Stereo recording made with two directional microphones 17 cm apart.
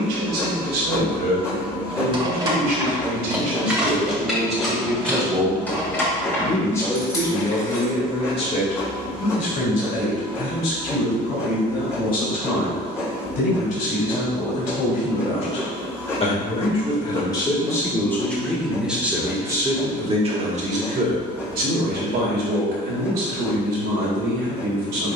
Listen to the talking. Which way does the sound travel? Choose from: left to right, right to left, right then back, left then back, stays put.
left then back.